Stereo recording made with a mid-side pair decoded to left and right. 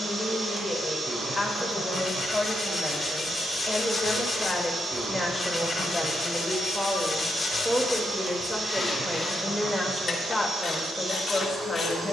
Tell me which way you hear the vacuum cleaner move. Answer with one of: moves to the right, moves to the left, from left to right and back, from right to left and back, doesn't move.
doesn't move.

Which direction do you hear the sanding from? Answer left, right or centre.
left.